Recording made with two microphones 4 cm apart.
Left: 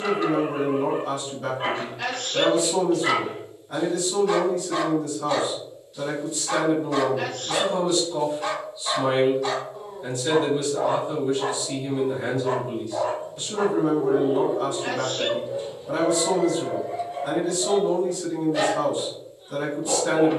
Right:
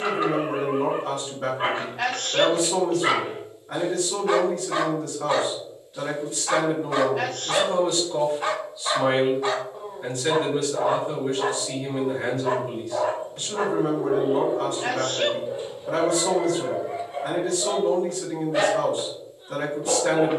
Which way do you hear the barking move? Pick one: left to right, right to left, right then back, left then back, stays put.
stays put.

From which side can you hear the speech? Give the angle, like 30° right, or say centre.
60° right.